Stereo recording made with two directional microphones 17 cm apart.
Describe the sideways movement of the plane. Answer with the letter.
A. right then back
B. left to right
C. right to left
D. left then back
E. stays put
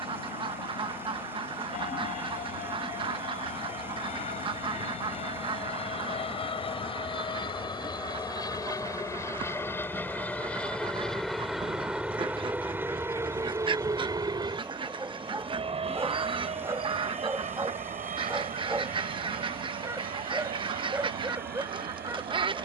B.